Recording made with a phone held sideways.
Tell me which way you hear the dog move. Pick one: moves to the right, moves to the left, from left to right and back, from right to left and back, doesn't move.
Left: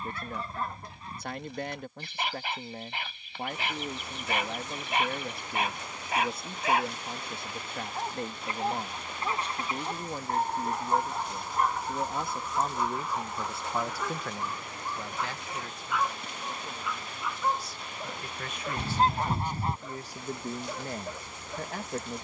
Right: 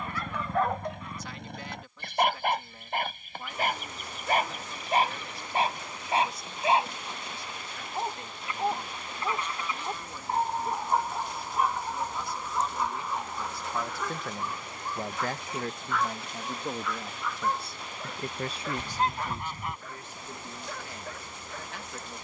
moves to the left.